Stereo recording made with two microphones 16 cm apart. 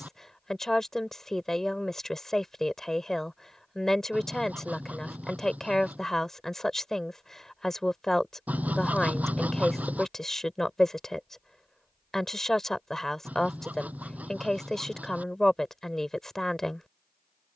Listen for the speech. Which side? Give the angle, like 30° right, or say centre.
centre.